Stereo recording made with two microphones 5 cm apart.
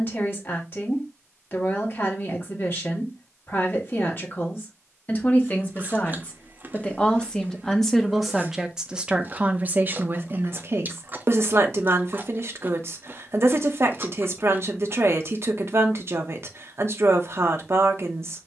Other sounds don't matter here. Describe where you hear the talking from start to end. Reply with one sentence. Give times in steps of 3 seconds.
You can hear the talking on the left from 0 s, in the centre from 6 s and on the right from 9 s.